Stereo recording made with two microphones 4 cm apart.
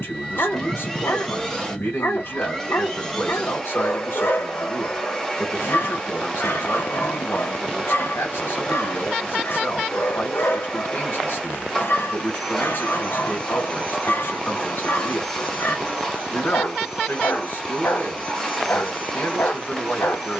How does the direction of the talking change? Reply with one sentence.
In this clip you hear the talking stay put.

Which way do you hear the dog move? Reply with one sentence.
You can hear the dog stay in one place.